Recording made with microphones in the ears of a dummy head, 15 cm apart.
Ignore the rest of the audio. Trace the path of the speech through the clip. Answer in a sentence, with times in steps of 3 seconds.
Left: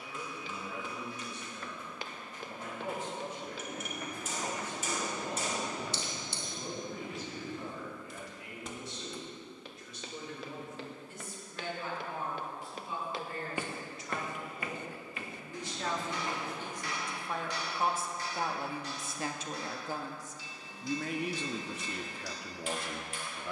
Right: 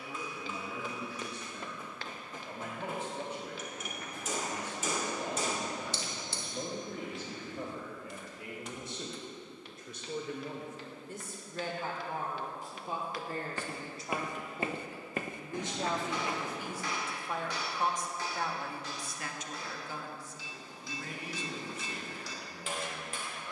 You can hear the speech on the right from 0 s, in the centre from 15 s and on the left from 18 s.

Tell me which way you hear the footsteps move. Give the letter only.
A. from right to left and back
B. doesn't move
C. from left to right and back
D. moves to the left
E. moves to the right
A.